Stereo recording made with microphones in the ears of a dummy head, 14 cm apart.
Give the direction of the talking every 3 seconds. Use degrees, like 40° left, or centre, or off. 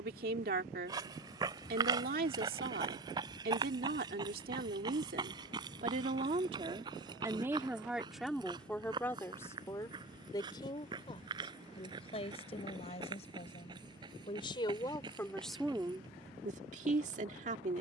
60° right, 60° right, 10° right, 20° left, 40° left, 30° right.